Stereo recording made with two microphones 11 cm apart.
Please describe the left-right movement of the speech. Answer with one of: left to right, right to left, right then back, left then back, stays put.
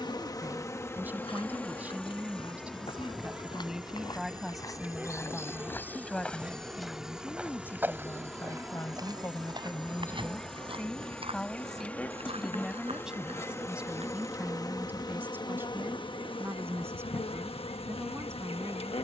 left then back.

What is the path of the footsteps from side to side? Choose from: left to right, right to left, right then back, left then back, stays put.
left to right.